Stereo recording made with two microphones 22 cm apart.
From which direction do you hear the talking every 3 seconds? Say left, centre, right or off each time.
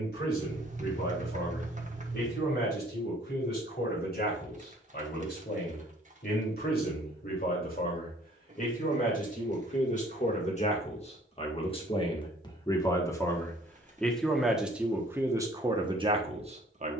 left, left, left, left, centre, right.